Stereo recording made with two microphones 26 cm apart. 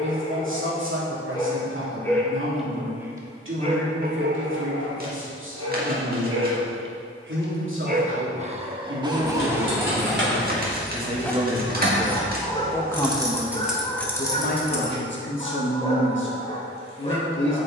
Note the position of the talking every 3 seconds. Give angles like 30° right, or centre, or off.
50° right, 50° right, 50° right, 30° right, 20° left, 50° left.